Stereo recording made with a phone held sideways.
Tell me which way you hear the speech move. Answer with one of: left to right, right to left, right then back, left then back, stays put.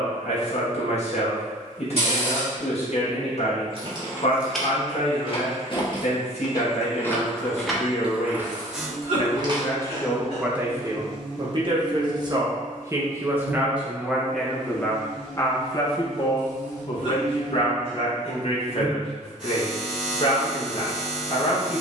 right then back.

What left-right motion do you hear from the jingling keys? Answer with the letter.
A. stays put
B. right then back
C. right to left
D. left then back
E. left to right
D.